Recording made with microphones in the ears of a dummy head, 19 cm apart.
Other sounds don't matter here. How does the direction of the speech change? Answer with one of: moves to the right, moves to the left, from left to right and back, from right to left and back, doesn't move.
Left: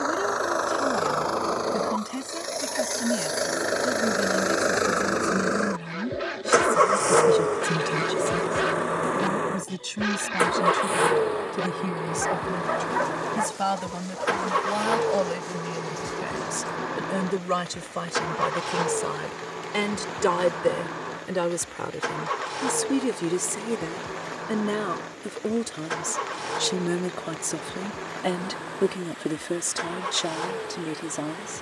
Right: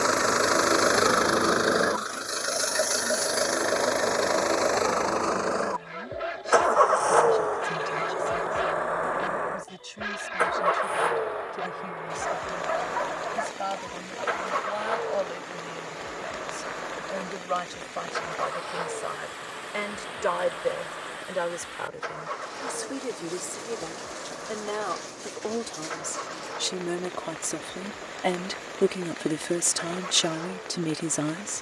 moves to the right.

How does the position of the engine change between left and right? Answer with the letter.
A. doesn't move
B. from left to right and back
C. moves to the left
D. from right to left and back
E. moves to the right
C.